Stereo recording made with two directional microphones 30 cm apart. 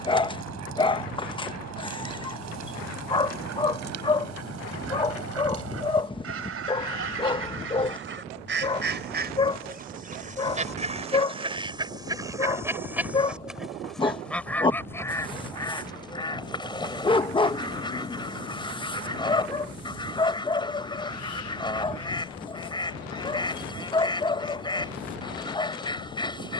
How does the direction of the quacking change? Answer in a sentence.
You can hear the quacking move from right to left.